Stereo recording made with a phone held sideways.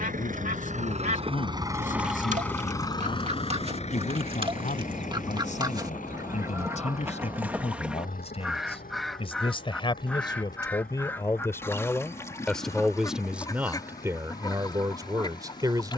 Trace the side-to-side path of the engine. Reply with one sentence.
You can hear the engine go from the right side to the left.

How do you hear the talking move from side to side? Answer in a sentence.
You can hear the talking travel towards the right.